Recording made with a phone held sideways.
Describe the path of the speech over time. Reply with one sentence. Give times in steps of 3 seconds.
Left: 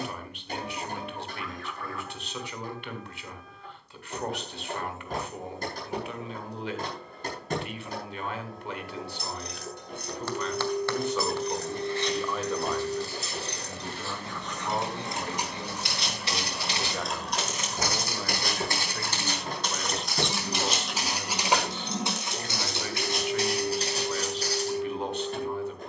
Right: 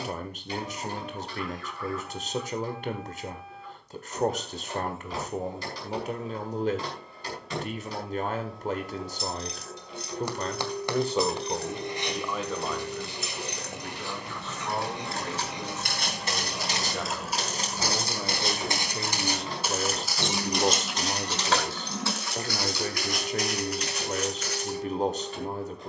You can hear the speech on the right from 0 s, in the centre from 12 s and on the right from 18 s.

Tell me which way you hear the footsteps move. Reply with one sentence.
In this clip you hear the footsteps move from right to left.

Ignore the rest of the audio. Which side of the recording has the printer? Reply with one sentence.
In this clip you hear the printer on the left.